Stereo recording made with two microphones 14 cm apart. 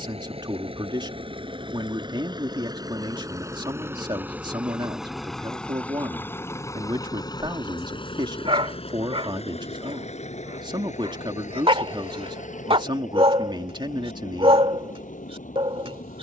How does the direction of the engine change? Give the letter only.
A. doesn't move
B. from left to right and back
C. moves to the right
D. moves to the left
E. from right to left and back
D.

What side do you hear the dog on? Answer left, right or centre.
right.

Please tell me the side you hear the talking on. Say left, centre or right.
right.